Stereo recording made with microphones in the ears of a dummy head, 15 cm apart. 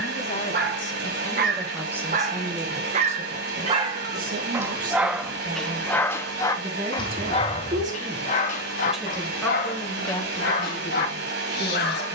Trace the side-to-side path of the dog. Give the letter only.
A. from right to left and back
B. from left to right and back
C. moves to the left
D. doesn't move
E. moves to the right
C.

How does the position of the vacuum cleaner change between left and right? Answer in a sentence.
You can hear the vacuum cleaner stay put.